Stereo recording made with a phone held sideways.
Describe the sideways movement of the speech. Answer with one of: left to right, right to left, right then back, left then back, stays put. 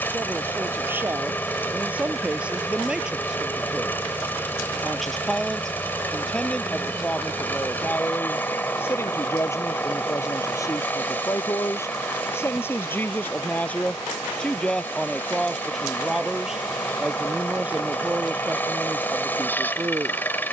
left then back.